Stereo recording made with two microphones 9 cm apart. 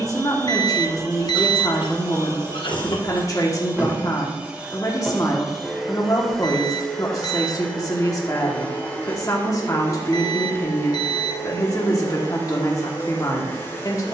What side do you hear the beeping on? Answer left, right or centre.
left.